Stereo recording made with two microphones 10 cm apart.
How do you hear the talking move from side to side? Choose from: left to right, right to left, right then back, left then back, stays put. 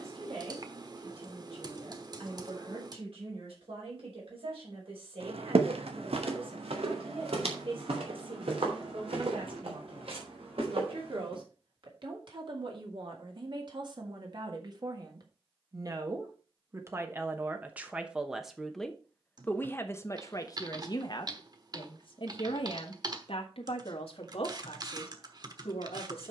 right to left.